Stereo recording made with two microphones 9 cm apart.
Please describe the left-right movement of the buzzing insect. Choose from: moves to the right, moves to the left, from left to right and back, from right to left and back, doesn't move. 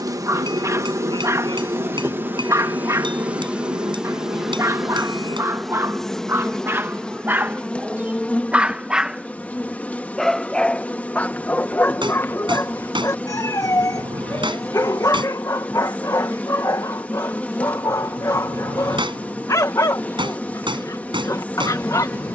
moves to the left.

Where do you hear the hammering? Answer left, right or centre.
right.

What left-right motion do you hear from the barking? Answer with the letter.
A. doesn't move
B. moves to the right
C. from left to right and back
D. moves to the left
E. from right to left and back
D.